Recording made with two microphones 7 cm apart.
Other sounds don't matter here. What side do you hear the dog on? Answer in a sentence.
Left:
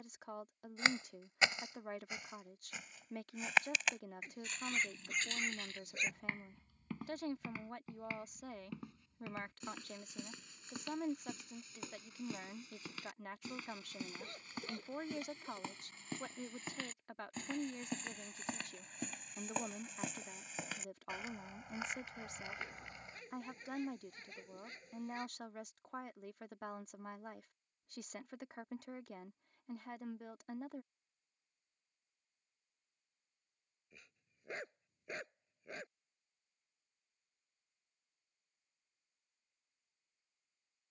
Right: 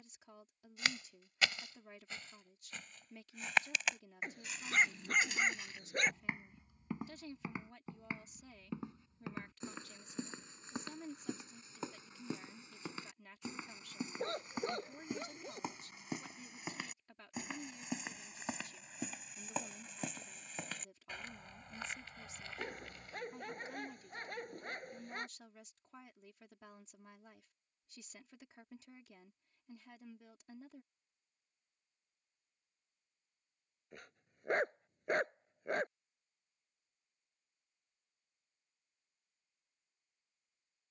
You can hear the dog on the right.